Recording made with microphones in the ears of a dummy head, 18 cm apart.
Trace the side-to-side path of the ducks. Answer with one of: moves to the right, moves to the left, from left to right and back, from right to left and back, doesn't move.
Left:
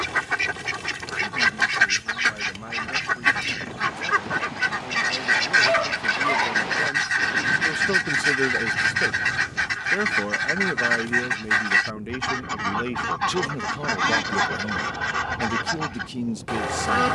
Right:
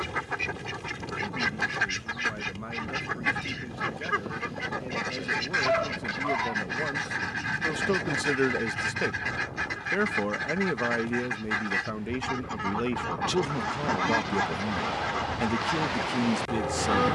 doesn't move.